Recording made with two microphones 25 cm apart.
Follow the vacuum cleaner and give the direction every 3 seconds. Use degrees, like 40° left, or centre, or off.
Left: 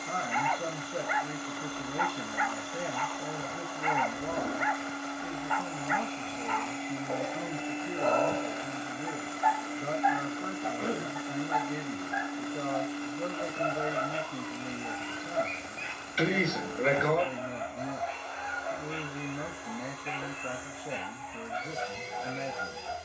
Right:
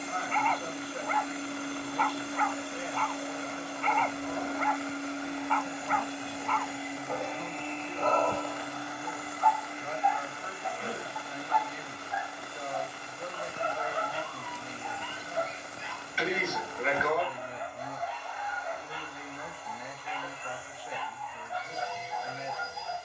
30° right, 20° right, 10° left, 40° left, 60° left, 70° left, 80° left, 80° left.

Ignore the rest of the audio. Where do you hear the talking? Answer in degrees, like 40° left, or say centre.
50° left.